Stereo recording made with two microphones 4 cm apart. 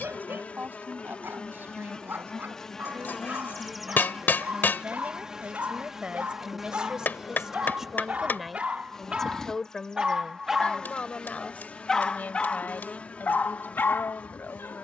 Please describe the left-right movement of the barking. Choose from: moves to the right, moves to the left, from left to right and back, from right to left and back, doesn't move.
moves to the left.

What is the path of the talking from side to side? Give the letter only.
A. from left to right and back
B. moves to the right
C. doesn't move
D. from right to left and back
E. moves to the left
E.